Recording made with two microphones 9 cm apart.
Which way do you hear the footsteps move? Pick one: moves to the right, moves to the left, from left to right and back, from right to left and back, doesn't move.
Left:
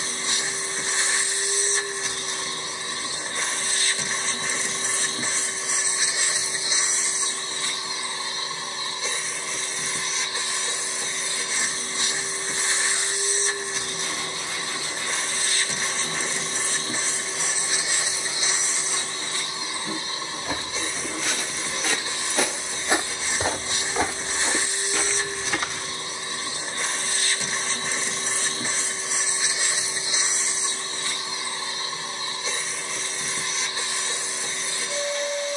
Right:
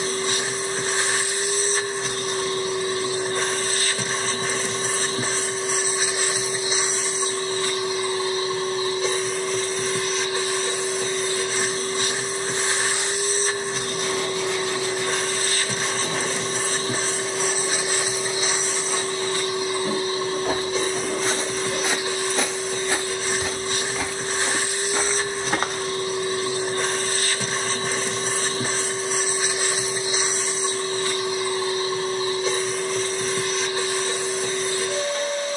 from right to left and back.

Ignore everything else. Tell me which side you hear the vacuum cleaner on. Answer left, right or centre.
right.